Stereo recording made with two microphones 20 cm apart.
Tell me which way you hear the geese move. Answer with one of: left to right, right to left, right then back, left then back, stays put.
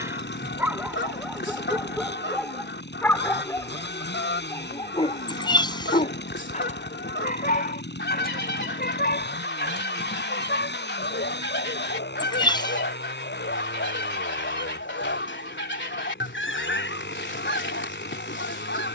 stays put.